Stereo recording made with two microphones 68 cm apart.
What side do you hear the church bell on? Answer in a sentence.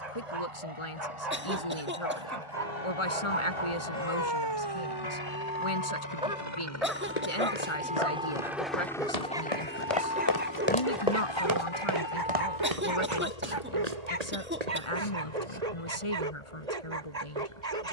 In this clip you hear the church bell on the left.